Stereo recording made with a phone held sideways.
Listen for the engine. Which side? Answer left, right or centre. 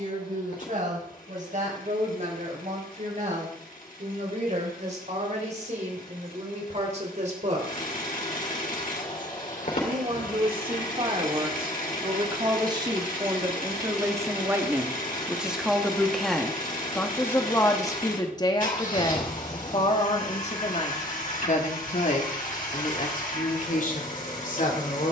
left.